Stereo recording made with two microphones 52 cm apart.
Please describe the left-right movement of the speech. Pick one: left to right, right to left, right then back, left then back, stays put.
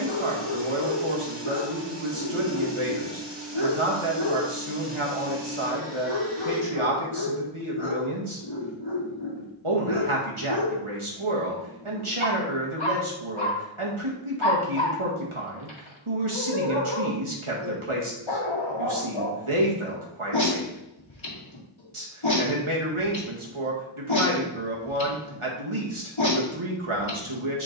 stays put.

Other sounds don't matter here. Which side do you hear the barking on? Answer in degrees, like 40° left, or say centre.
60° left.